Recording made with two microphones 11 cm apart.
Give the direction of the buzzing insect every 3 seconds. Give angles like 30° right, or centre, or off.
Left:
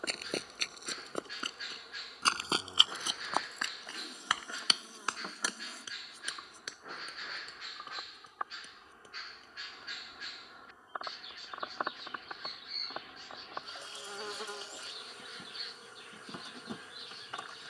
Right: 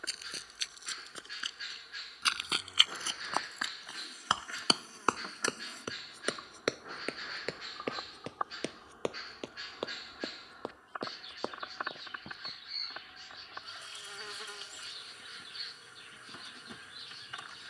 30° left, 20° left, 10° right, centre, 30° left, 30° left.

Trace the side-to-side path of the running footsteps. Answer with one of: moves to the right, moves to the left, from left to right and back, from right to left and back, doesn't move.
moves to the right.